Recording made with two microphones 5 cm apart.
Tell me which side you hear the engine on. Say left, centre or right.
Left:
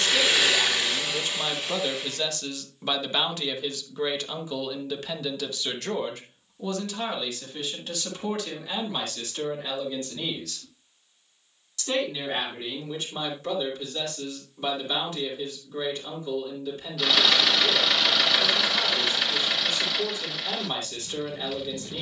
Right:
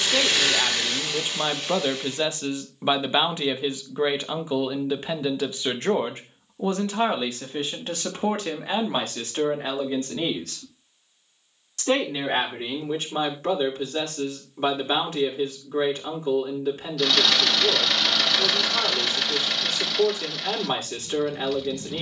centre.